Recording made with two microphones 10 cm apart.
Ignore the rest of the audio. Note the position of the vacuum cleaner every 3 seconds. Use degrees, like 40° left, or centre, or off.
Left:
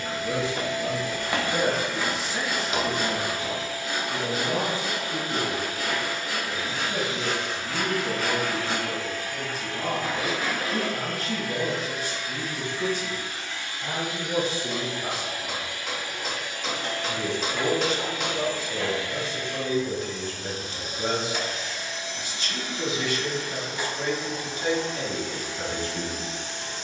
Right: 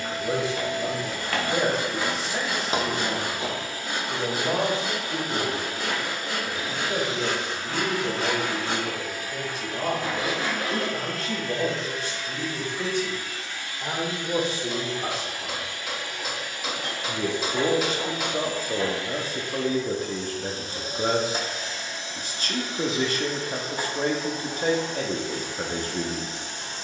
40° right, 40° right, 30° right, centre, 20° left, centre, 30° right, 30° right, 30° right.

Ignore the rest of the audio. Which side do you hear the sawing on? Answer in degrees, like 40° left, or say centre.
40° right.